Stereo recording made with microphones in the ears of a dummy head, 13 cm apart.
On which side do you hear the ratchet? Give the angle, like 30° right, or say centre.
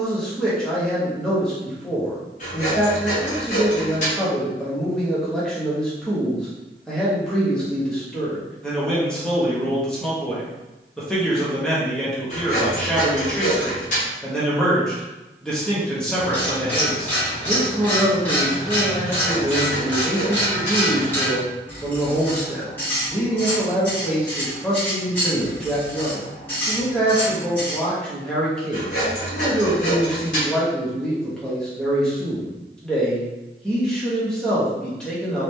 10° left.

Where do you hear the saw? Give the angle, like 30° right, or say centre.
50° left.